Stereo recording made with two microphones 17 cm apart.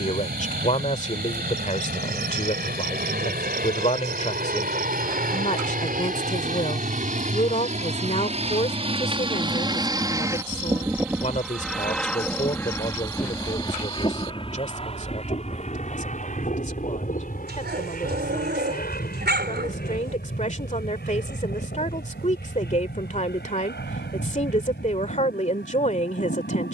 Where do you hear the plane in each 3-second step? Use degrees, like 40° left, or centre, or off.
70° right, 70° right, 50° right, 20° right, 20° left, 40° left, 60° left, 60° left, 70° left.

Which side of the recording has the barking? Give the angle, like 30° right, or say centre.
80° right.